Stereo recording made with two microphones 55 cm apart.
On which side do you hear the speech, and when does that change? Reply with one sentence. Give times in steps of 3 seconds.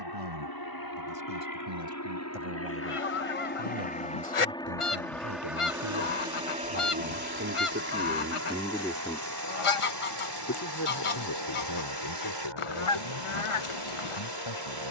In this clip you hear the speech on the right from 0 s and on the left from 9 s.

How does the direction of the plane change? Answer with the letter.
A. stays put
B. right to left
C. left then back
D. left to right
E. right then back
D.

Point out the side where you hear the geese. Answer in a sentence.
You can hear the geese on the left.